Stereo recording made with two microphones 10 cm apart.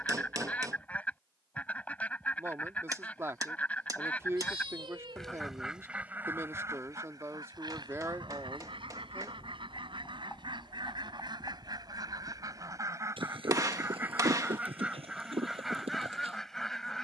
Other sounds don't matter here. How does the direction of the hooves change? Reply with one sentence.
In this clip you hear the hooves travel towards the right.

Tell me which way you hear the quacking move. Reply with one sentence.
You can hear the quacking go right and come back.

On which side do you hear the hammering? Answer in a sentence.
You can hear the hammering on the right.